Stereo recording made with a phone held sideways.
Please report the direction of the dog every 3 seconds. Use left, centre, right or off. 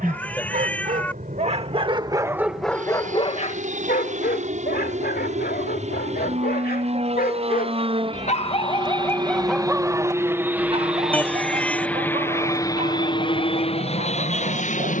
right, left, left, right, right.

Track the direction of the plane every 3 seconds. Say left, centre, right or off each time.
right, right, right, centre, left.